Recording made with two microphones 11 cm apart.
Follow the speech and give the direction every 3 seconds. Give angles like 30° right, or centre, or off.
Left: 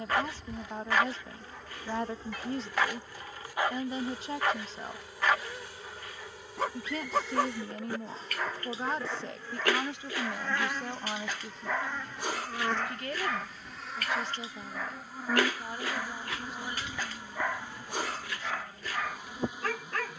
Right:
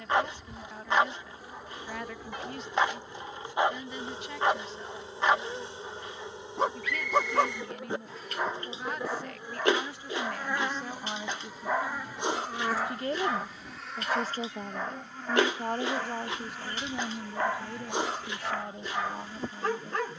30° left, 30° left, 30° left, 10° left, 40° right, 60° right, 70° right.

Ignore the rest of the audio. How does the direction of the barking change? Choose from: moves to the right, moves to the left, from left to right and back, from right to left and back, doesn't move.
doesn't move.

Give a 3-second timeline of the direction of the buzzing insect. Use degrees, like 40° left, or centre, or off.
10° right, 30° right, 20° right, 10° right, centre, 10° left, 10° left.